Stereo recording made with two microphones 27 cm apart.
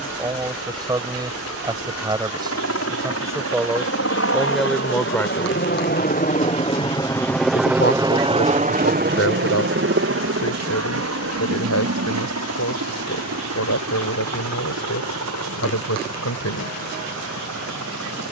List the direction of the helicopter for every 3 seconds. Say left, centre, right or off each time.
left, left, centre, right, right, right.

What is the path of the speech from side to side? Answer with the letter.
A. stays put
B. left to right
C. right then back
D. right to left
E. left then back
D.